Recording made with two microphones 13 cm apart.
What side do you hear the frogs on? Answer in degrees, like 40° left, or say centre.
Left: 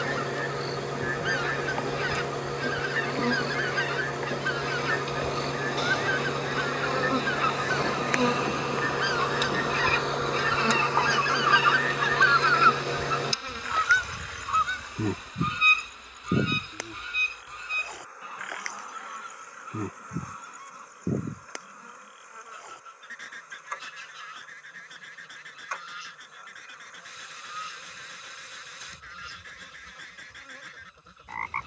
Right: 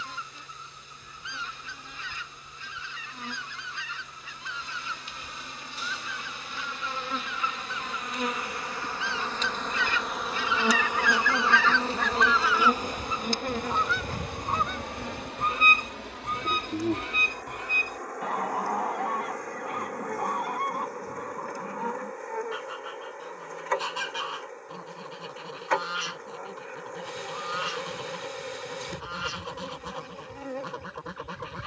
70° left.